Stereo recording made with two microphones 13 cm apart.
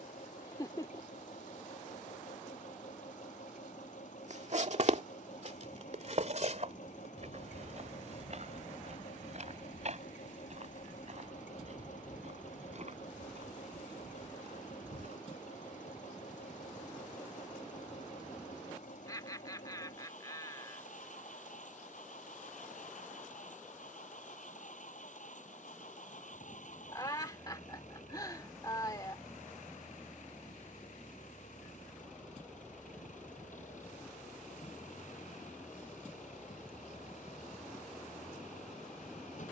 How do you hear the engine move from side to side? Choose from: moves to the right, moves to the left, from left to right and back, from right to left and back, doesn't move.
doesn't move.